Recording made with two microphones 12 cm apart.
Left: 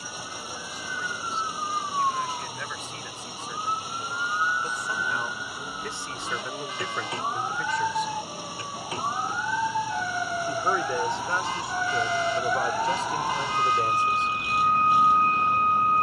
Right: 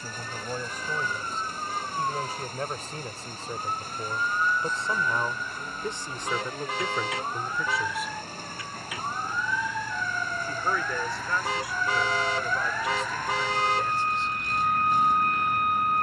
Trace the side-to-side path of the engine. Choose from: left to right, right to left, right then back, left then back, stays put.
stays put.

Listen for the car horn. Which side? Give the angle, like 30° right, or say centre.
70° right.